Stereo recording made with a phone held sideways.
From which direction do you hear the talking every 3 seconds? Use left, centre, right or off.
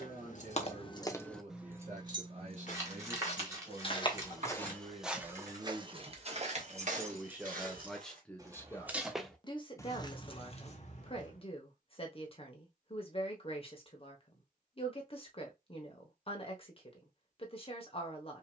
right, right, centre, left, left, left.